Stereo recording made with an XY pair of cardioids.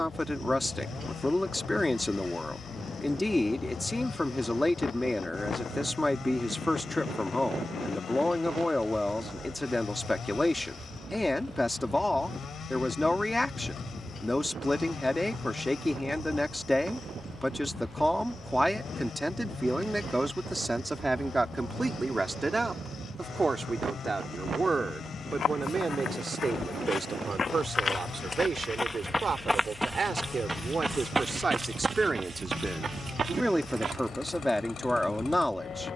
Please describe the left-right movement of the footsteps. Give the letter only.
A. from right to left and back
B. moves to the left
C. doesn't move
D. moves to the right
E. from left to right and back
D.